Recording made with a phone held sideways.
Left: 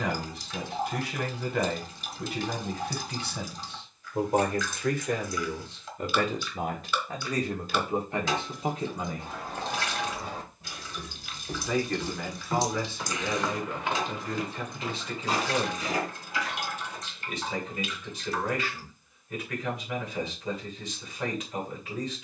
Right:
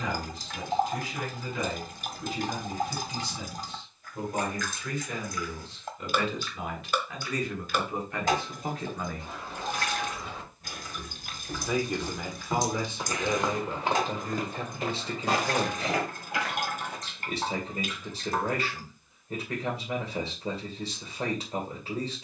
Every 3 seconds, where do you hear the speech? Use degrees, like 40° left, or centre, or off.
70° left, 60° left, 30° left, centre, 20° right, 30° right, 30° right, 30° right.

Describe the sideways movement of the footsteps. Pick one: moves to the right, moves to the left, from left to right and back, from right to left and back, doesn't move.
moves to the right.